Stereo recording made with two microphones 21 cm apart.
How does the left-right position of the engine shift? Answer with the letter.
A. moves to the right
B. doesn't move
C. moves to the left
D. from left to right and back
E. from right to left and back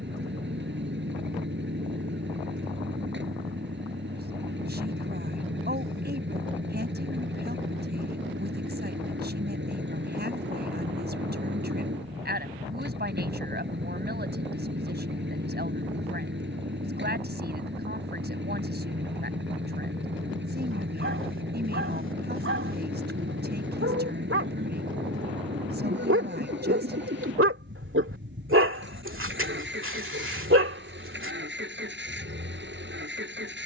B.